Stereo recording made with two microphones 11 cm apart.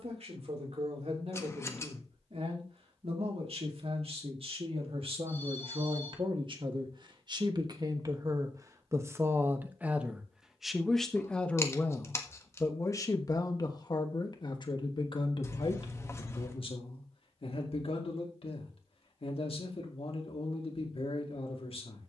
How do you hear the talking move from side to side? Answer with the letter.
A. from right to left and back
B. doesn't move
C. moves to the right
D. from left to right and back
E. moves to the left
E.